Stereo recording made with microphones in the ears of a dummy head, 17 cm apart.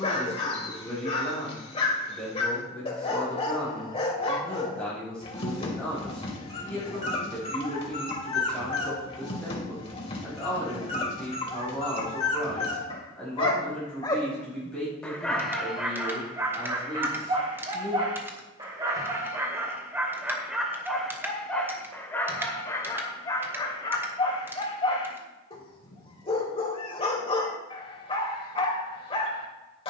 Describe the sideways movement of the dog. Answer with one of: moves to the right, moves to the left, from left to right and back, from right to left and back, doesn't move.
from left to right and back.